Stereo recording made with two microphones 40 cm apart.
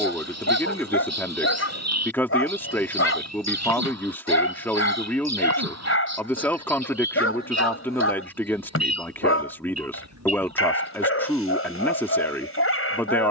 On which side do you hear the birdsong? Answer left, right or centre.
right.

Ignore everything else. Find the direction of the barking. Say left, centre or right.
left.